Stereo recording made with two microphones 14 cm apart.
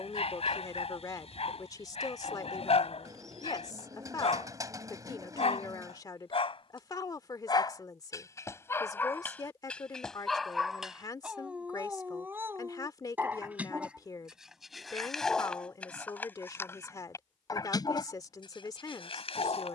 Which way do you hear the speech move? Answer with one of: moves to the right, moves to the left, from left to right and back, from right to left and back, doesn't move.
doesn't move.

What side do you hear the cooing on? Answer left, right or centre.
right.